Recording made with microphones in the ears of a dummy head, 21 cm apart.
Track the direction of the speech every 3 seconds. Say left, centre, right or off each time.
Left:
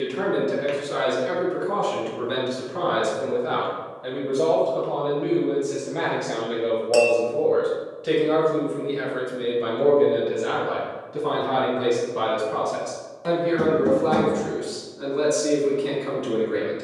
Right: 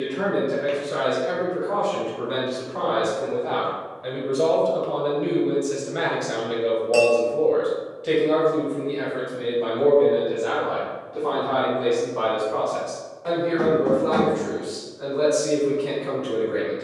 left, centre, centre, left, left, left.